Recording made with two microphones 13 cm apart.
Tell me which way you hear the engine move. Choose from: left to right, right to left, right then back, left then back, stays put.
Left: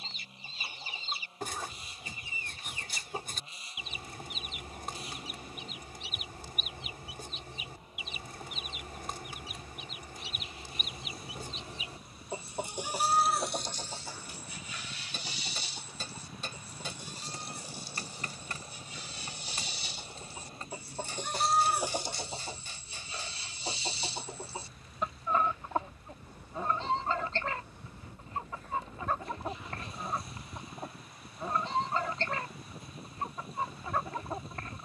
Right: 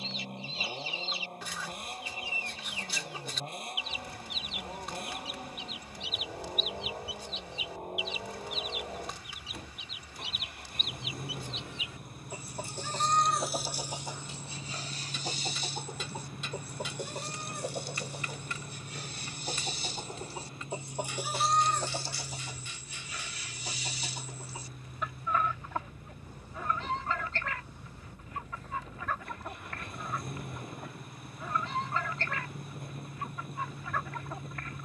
stays put.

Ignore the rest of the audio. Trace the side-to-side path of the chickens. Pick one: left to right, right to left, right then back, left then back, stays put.
right then back.